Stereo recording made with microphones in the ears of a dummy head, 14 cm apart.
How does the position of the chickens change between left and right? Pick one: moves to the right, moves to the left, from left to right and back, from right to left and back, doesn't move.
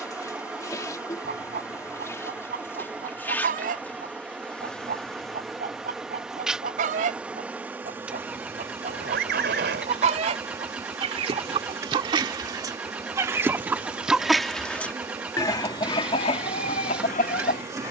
moves to the left.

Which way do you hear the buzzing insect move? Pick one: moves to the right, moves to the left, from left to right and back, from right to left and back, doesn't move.
moves to the right.